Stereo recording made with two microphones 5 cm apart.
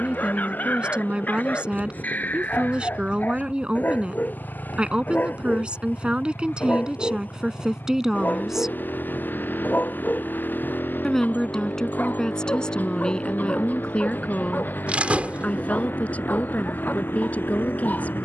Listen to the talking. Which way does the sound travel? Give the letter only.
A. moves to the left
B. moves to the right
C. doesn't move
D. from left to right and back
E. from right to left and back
A.